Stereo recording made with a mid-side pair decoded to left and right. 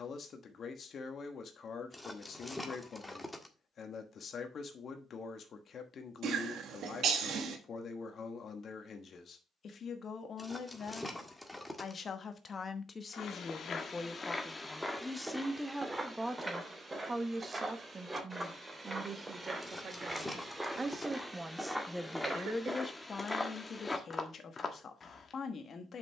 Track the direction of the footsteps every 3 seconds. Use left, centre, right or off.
off, off, off, off, left, right, right, centre, left.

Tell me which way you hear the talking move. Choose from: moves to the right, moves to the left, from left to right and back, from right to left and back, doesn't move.
from left to right and back.